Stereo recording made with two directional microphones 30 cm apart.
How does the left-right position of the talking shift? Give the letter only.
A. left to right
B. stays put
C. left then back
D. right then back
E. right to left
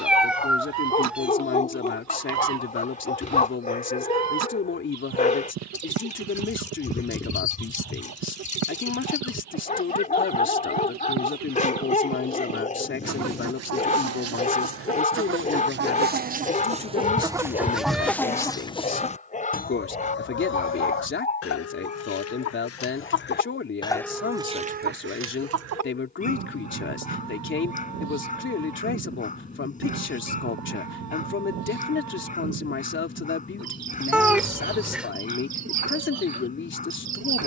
B.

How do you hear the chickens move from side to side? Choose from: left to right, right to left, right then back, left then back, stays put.
left then back.